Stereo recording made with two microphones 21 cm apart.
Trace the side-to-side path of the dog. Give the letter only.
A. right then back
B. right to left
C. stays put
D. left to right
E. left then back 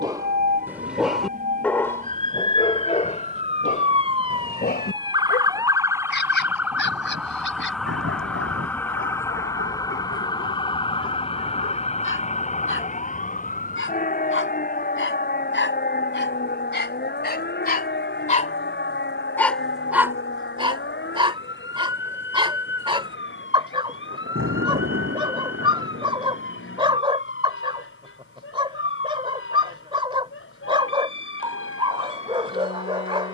E.